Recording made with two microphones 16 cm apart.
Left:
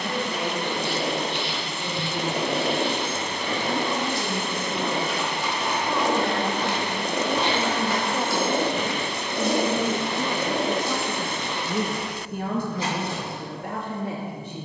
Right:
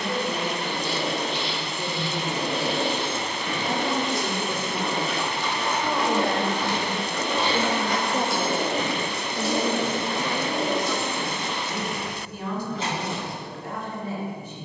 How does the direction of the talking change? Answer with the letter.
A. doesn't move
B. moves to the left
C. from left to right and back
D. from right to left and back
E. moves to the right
B.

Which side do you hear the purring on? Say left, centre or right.
left.